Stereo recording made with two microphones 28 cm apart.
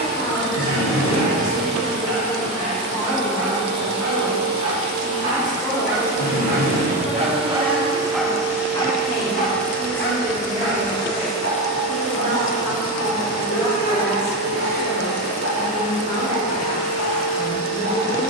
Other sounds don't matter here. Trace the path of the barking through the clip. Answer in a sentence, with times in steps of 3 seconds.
In this clip you hear the barking on the right from 0 s, in the centre from 6 s and on the left from 9 s.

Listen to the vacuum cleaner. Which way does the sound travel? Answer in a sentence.
In this clip you hear the vacuum cleaner go from the right side to the left.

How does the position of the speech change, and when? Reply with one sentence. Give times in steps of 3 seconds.
In this clip you hear the speech on the left from 0 s, in the centre from 6 s, on the right from 9 s, in the centre from 12 s and on the left from 15 s.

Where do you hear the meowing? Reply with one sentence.
You can hear the meowing on the left.